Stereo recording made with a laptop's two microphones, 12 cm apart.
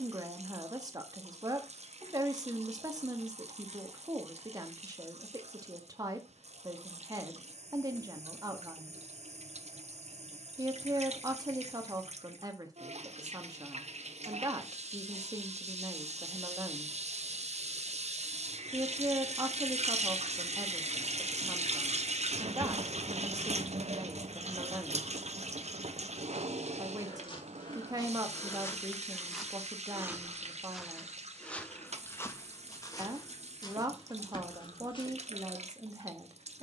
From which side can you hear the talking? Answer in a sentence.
In this clip you hear the talking on the right.